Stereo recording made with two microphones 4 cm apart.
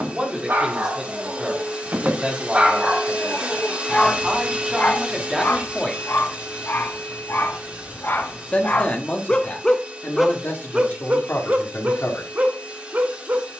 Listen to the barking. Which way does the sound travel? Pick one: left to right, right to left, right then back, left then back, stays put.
left then back.